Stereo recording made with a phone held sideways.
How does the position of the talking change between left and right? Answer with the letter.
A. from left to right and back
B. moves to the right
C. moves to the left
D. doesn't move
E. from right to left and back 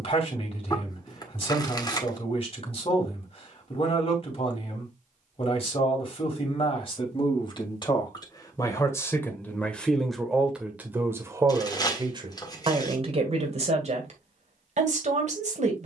B.